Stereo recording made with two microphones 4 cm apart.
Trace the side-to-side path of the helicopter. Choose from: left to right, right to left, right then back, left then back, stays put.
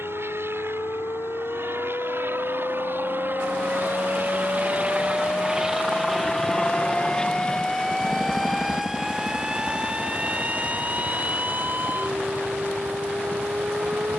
right to left.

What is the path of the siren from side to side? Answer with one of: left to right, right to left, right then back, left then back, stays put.
left to right.